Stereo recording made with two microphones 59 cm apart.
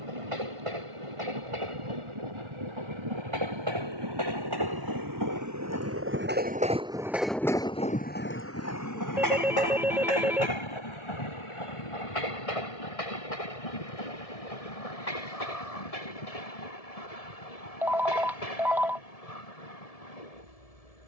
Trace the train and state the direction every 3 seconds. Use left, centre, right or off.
right, right, centre, left, left, left, left.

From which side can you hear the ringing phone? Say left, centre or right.
centre.